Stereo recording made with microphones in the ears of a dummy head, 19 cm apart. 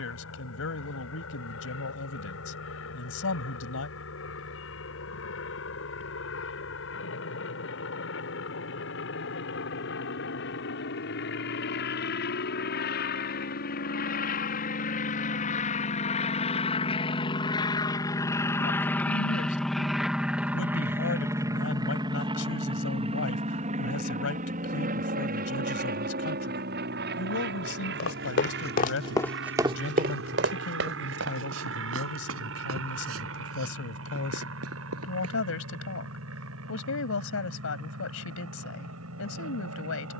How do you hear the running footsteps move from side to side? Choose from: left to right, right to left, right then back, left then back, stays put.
left to right.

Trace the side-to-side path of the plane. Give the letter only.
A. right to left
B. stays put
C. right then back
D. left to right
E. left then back
D.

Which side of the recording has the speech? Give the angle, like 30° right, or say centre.
80° left.